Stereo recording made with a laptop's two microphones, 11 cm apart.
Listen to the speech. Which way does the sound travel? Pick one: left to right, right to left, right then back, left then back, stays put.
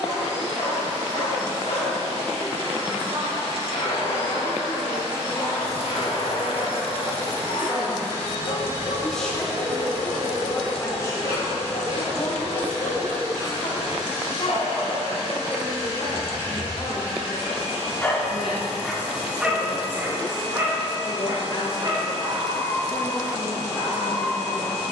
right to left.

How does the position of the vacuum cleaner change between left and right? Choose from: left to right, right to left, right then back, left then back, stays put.
stays put.